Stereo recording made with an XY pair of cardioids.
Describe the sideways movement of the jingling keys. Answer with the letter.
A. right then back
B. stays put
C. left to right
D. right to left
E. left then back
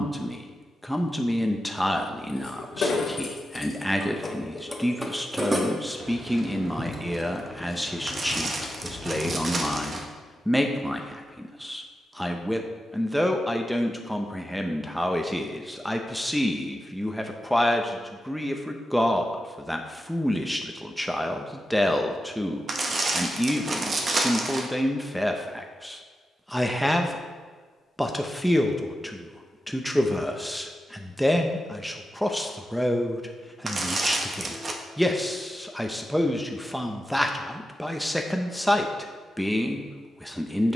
A.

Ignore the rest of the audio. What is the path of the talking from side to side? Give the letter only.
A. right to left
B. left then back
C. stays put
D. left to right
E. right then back
C.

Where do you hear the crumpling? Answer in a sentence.
You can hear the crumpling on the right.